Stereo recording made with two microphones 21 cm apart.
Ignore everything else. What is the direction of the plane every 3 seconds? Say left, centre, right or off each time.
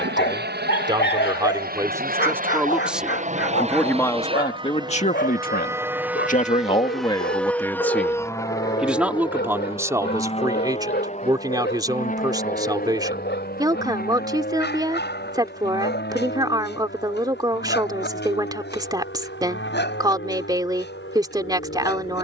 right, right, centre, left, left, left, left, left.